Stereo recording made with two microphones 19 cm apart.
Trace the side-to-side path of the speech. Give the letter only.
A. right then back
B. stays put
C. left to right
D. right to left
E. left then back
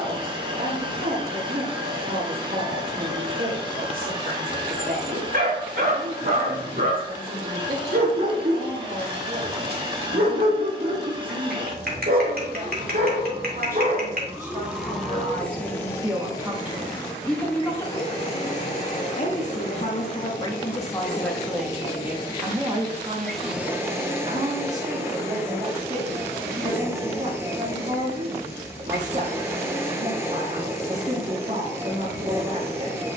E.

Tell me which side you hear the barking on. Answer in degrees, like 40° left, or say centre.
60° right.